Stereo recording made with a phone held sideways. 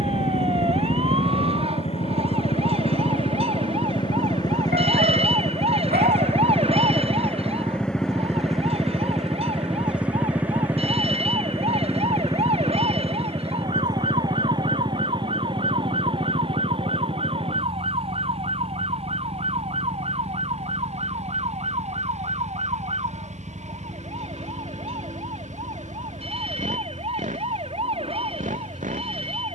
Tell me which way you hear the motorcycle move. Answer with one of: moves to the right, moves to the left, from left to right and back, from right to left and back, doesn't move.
moves to the right.